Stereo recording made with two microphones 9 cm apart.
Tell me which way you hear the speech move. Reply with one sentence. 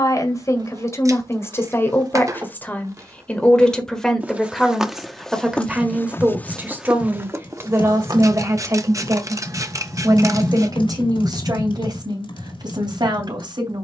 In this clip you hear the speech go from the left side to the right.